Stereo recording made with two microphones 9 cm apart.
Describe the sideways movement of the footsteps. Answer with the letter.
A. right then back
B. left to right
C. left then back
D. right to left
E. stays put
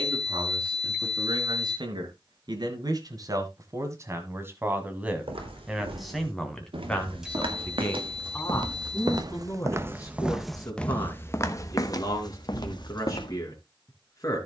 D.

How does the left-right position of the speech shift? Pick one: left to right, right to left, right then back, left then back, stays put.
right to left.